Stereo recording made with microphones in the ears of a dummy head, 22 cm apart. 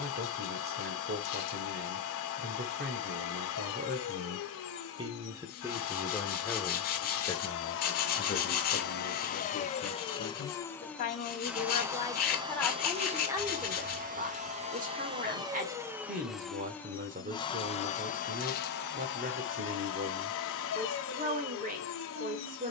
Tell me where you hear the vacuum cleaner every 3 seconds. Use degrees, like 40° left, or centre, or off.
60° left, 60° left, 50° left, 10° left, 30° right, centre, 50° left, 60° left.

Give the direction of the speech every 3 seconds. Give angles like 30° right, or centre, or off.
40° right, 30° right, 20° left, 40° left, 10° right, 30° right, 30° right, 30° right.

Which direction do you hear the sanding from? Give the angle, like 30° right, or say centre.
40° left.